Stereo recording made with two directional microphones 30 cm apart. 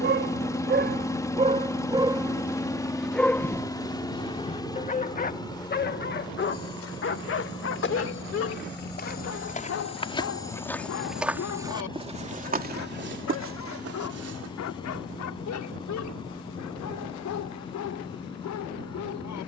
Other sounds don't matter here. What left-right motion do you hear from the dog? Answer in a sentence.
In this clip you hear the dog move to the left.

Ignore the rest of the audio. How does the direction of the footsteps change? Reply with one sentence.
You can hear the footsteps move to the right.